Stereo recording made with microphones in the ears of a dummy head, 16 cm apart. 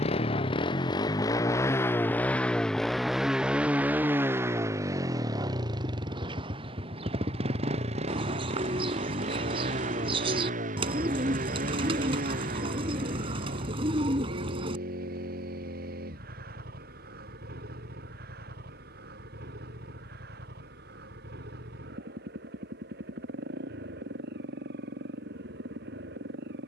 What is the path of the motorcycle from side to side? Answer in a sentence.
You can hear the motorcycle travel towards the right.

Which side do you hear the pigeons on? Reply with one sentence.
In this clip you hear the pigeons on the right.